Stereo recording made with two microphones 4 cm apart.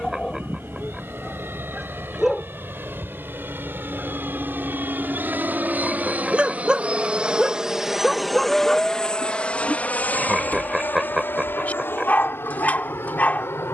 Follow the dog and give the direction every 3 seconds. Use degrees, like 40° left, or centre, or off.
centre, 30° right, 10° right, 40° left, 40° left.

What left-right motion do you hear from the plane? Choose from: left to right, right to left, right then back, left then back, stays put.
right to left.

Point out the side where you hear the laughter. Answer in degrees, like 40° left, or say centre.
10° right.